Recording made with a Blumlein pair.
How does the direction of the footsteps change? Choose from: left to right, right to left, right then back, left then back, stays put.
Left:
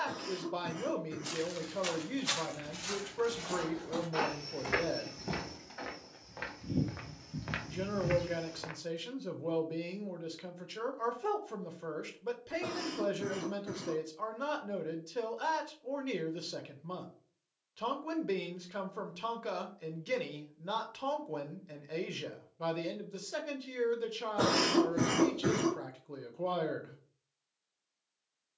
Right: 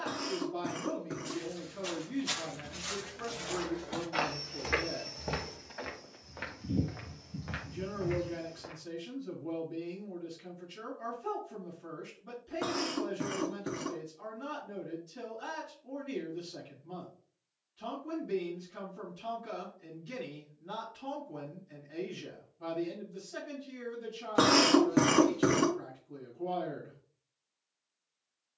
right then back.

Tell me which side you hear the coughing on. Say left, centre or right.
right.